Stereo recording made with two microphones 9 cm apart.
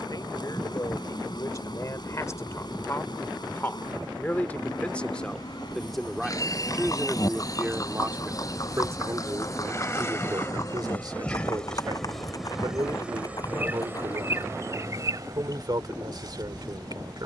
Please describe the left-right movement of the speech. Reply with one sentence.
You can hear the speech move from left to right.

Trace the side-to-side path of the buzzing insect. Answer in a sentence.
In this clip you hear the buzzing insect go from the left side to the right.